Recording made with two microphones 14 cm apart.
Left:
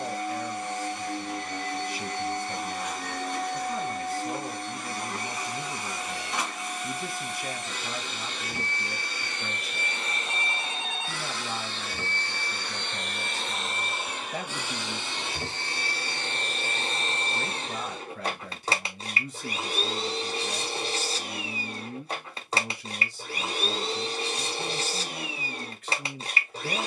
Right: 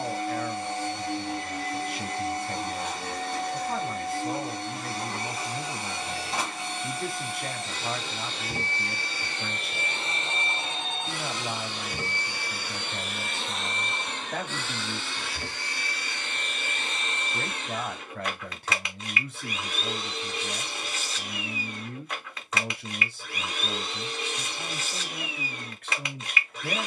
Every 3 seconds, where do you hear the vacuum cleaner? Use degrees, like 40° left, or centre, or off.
30° right, 30° right, 30° right, 30° right, centre, 30° left, 30° left, 30° left, 30° left.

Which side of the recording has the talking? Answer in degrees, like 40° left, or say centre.
70° right.